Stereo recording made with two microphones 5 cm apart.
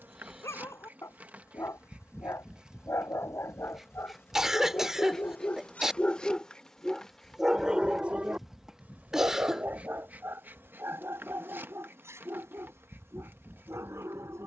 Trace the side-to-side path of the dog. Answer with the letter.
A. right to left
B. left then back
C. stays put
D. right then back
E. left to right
E.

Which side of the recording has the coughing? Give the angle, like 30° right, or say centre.
10° right.